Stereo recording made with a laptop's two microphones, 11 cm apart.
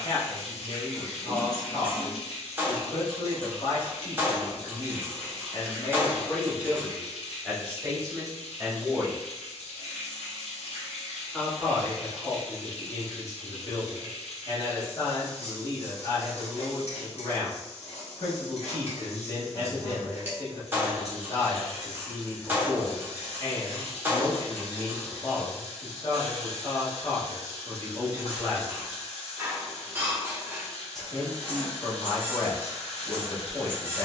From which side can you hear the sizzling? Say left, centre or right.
left.